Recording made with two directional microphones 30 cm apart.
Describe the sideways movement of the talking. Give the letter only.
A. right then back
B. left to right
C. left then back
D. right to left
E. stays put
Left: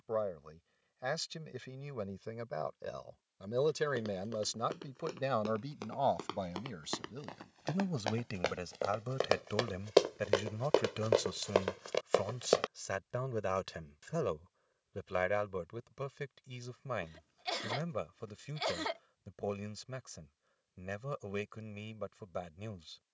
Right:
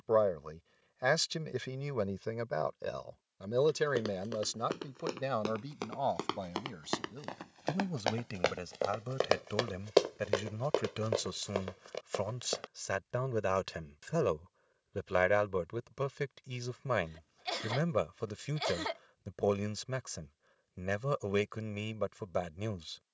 C.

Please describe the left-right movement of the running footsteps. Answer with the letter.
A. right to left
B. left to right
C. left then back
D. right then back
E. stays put
A.